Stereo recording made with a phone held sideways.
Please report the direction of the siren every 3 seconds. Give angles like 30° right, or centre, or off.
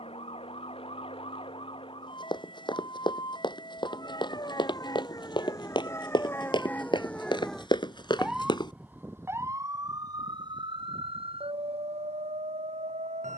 40° left, 30° left, centre, 30° right, 60° right.